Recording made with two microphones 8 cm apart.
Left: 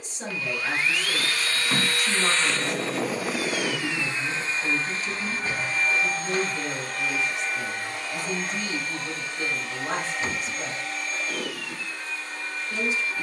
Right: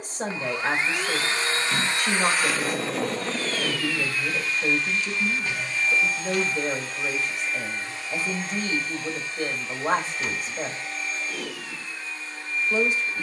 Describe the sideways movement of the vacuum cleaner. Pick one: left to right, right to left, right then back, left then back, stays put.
right to left.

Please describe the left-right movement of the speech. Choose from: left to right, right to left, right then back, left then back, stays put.
stays put.